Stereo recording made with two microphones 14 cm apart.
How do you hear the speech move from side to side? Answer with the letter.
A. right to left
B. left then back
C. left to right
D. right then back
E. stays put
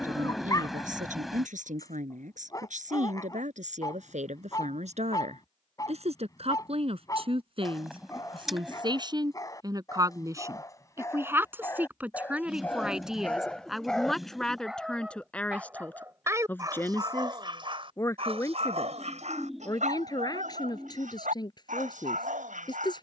A.